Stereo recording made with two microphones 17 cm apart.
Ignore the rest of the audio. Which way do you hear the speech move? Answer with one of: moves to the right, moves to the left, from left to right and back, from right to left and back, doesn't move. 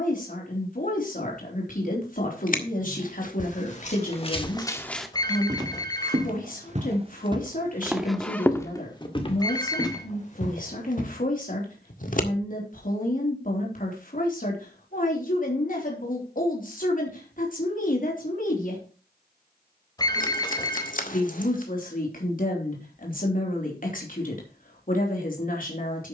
doesn't move.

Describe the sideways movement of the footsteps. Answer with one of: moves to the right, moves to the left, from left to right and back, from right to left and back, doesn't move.
from left to right and back.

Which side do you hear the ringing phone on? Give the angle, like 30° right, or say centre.
20° left.